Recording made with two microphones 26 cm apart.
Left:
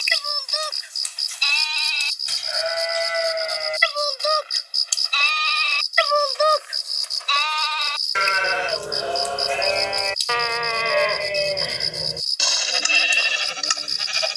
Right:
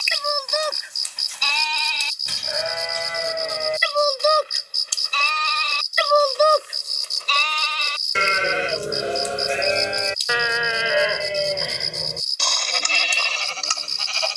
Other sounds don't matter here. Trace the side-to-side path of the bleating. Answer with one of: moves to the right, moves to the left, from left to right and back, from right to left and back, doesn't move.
moves to the left.